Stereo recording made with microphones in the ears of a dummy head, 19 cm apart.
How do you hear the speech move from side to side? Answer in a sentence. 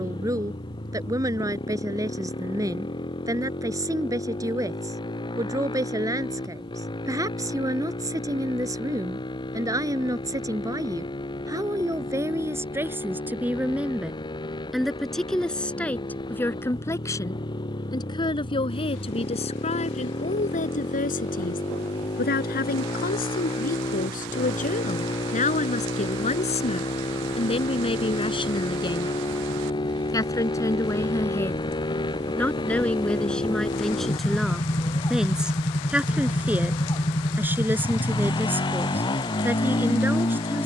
You can hear the speech go left and come back.